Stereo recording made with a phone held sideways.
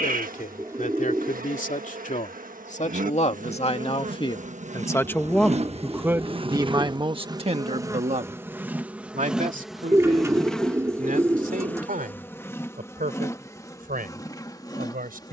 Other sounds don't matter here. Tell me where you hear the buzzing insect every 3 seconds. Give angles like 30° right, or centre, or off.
70° right, 60° right, 20° right, centre, 20° left.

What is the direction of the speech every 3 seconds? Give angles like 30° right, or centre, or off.
60° left, 30° left, 40° right, 70° right, 80° right.